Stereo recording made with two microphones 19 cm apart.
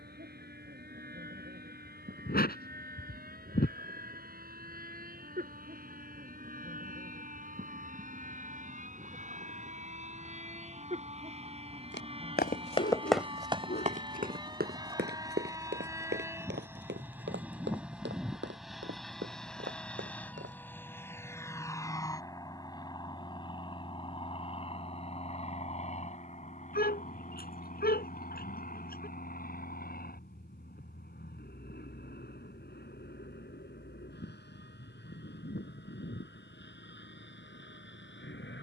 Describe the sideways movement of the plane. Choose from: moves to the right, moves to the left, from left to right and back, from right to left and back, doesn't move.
moves to the left.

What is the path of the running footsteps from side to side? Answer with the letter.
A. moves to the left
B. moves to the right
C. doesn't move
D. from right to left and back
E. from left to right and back
B.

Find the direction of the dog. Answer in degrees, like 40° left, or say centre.
50° left.